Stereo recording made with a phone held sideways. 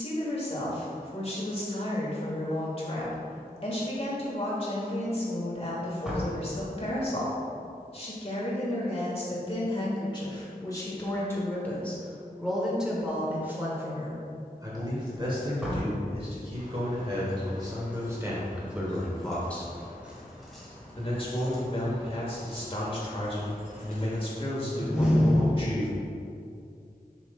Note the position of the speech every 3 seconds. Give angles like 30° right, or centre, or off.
40° left, 40° left, 40° left, 20° left, 10° right, 30° right, centre, 30° left, 30° left.